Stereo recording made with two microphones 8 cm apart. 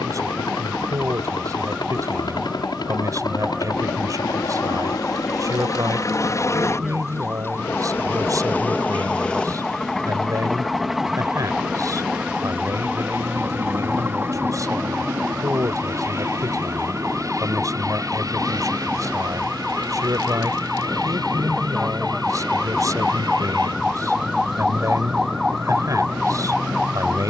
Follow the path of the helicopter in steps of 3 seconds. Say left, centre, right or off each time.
left, left, left, centre, right, right, right, right, right.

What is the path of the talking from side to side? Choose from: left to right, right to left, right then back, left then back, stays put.
stays put.